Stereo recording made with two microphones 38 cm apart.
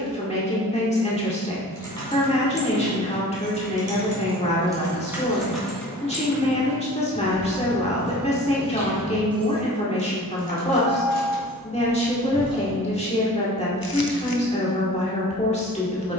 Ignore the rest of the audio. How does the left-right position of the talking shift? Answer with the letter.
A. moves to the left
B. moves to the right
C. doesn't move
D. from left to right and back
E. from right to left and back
C.